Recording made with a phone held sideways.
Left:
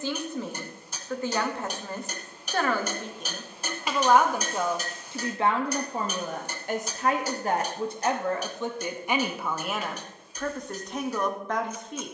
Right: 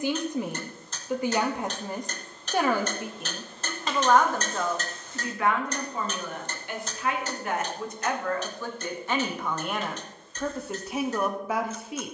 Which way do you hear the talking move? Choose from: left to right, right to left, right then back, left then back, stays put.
left then back.